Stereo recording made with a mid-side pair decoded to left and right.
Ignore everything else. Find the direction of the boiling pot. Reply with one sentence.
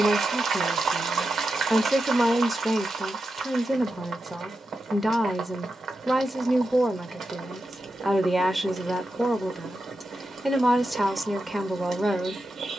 In this clip you hear the boiling pot on the right.